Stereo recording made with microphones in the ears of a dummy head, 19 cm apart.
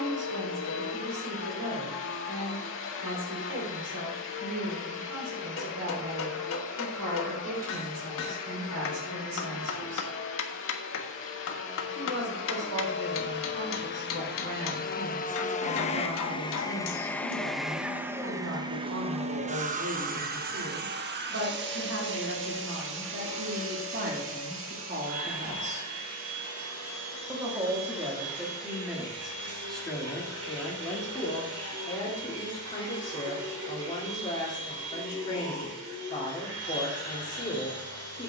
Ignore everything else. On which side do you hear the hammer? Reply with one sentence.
In this clip you hear the hammer on the left.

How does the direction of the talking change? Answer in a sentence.
You can hear the talking travel towards the left.